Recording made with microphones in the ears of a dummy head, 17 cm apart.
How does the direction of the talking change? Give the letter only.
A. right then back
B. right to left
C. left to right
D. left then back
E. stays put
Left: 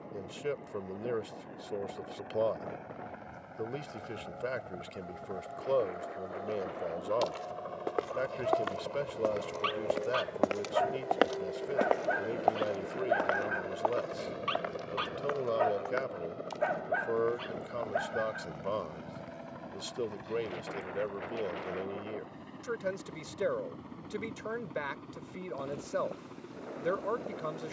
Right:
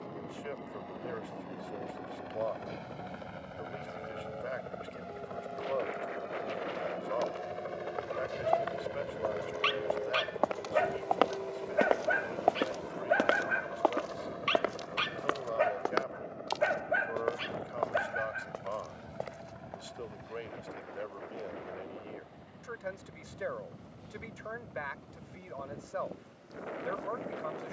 E.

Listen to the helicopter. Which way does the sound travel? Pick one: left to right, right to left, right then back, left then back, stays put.
right to left.